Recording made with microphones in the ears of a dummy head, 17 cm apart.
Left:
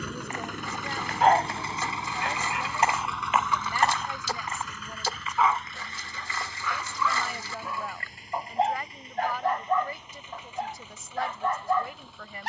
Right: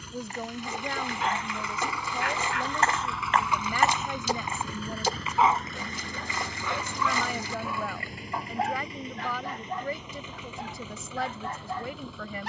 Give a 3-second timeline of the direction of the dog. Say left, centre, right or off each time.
left, centre, centre, left.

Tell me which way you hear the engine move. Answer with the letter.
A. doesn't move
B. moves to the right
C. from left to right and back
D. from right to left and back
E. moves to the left
B.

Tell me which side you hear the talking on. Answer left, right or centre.
right.